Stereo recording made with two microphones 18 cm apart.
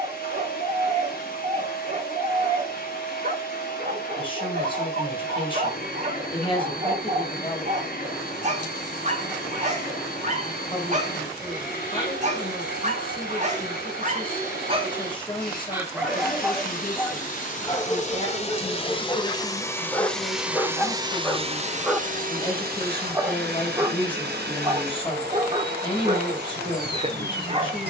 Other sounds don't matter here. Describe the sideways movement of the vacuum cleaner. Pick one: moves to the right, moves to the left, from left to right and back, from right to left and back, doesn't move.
moves to the right.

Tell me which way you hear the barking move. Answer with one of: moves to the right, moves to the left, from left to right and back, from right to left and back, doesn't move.
from right to left and back.